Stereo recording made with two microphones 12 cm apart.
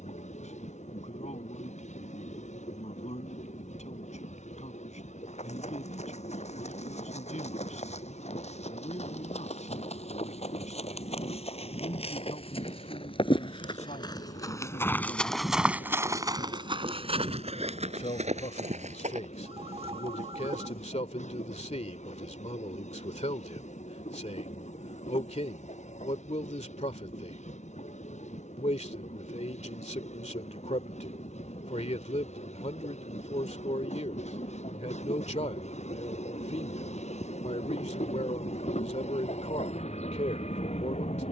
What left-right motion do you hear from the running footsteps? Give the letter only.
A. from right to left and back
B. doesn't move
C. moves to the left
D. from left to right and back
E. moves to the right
E.